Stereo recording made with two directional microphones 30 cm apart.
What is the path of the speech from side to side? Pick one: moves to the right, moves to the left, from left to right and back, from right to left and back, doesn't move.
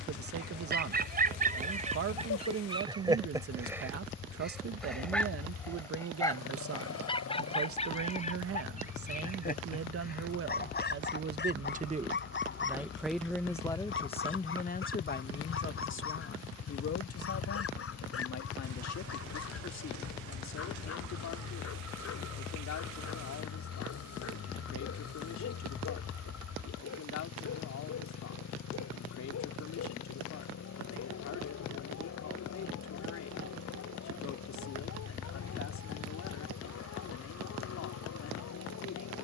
moves to the left.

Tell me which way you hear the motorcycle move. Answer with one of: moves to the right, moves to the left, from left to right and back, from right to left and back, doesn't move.
doesn't move.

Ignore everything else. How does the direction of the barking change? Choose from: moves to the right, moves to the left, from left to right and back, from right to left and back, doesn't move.
moves to the left.